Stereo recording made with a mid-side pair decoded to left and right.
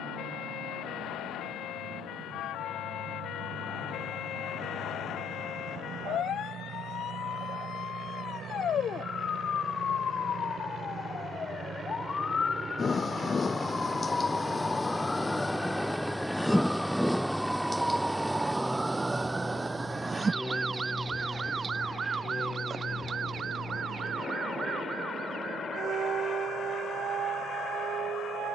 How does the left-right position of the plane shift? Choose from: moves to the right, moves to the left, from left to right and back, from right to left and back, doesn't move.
moves to the left.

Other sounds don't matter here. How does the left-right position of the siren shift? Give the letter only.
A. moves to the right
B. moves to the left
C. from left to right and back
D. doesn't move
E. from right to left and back
A.